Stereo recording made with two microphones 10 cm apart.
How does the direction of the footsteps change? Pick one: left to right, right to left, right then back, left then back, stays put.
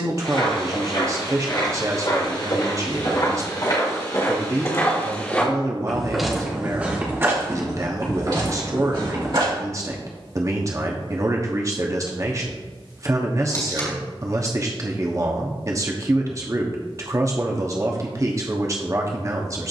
left to right.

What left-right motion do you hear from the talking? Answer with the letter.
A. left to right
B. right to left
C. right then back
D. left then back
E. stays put
E.